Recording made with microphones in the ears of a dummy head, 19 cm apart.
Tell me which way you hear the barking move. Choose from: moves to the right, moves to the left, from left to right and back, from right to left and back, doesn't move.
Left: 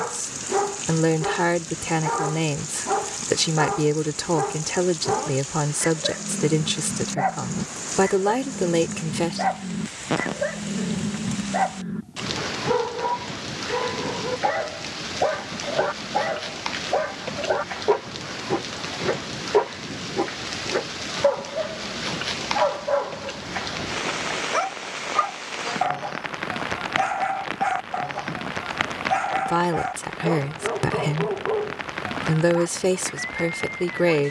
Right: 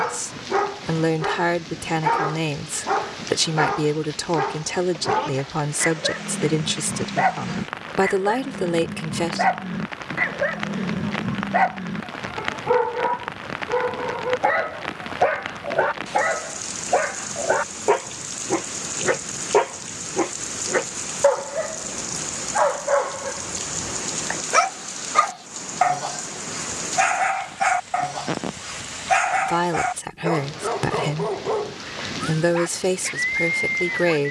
doesn't move.